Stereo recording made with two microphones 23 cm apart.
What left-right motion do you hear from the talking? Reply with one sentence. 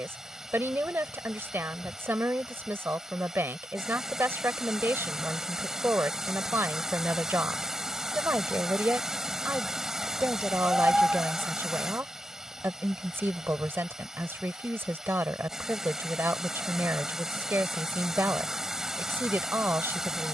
You can hear the talking stay put.